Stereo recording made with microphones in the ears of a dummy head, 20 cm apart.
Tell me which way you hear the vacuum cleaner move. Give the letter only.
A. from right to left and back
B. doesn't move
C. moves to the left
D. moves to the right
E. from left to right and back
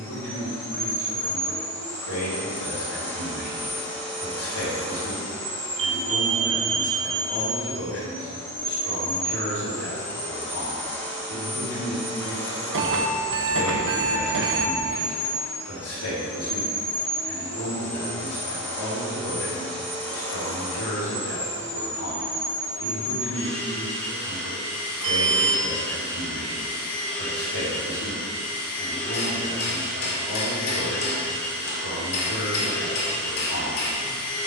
B.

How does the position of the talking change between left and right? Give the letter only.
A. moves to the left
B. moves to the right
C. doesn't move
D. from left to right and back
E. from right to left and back
C.